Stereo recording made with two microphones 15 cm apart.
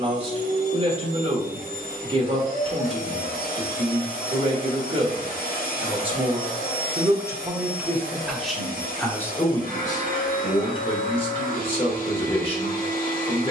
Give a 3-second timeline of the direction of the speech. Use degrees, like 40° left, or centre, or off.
40° right, 40° right, 10° right, 30° left, 40° left.